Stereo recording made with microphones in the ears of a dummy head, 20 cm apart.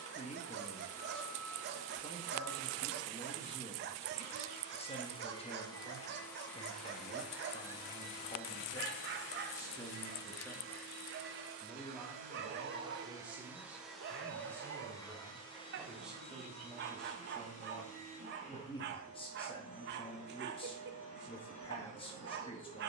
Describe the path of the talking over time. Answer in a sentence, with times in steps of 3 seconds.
In this clip you hear the talking on the left from 0 s, in the centre from 9 s and on the left from 18 s.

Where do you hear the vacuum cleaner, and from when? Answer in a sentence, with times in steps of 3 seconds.
You can hear the vacuum cleaner on the left from 0 s, in the centre from 6 s, on the right from 9 s, in the centre from 12 s and on the left from 15 s.